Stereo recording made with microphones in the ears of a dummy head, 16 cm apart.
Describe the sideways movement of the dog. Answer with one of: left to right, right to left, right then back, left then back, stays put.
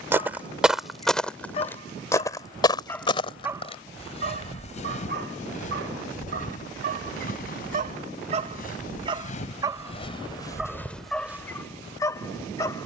right then back.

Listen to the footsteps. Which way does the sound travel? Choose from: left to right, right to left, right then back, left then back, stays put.
left then back.